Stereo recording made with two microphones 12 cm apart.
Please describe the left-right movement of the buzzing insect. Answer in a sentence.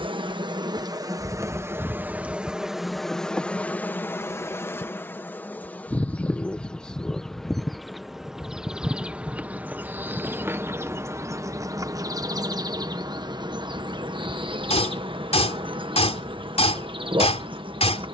You can hear the buzzing insect go left and come back.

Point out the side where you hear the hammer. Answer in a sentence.
In this clip you hear the hammer on the left.